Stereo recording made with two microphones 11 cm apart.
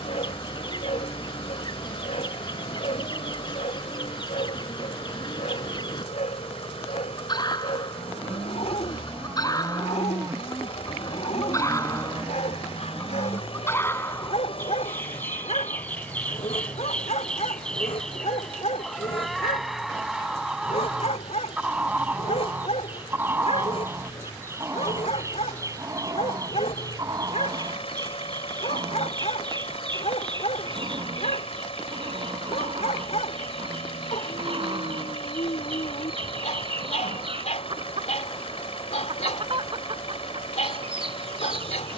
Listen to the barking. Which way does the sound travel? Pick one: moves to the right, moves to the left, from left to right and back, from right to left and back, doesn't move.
doesn't move.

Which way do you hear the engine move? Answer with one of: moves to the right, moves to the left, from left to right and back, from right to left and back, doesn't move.
doesn't move.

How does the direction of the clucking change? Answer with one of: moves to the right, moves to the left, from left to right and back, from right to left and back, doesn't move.
moves to the right.